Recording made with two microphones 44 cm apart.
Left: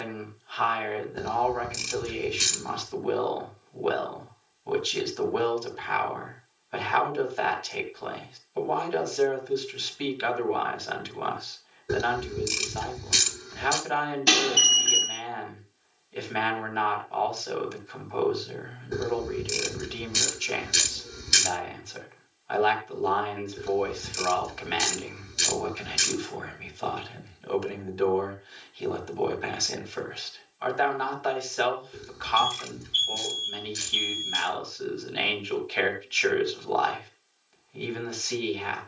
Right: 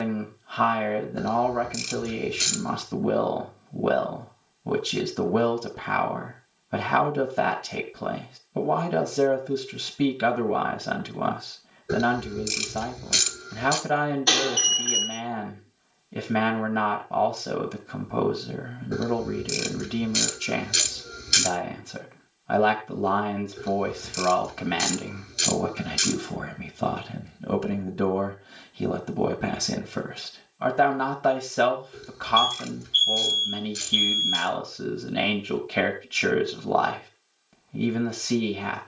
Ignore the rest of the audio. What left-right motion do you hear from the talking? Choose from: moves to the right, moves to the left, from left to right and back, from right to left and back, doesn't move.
doesn't move.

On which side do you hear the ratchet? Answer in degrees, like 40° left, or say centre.
10° left.